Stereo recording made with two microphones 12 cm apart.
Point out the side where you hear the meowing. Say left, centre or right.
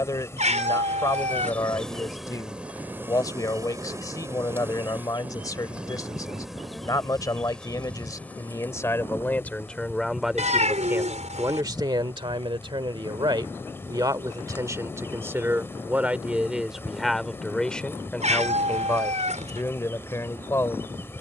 right.